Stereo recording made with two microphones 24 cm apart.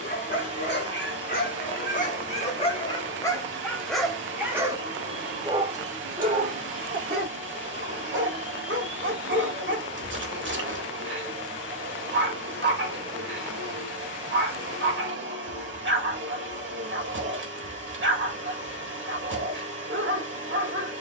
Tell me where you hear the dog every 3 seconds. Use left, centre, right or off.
left, centre, right, right, right, right, right.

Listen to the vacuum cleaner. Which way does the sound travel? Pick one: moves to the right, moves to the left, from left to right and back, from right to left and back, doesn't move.
doesn't move.